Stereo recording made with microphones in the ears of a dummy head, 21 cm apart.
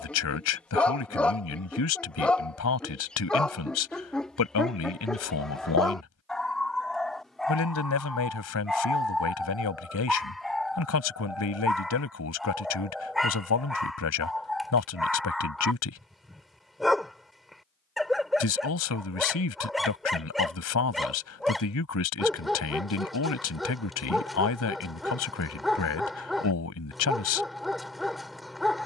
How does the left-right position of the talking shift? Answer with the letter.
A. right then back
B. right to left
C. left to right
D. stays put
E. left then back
D.